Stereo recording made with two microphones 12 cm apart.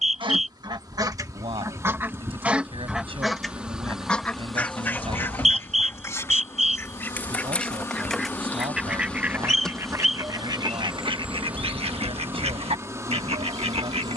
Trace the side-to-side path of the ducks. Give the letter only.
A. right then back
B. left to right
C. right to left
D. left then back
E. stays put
D.